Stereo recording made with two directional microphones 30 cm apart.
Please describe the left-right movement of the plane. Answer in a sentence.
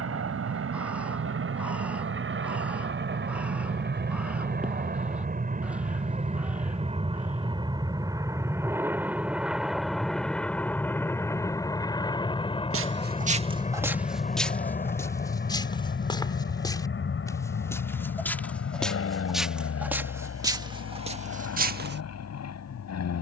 In this clip you hear the plane move to the left.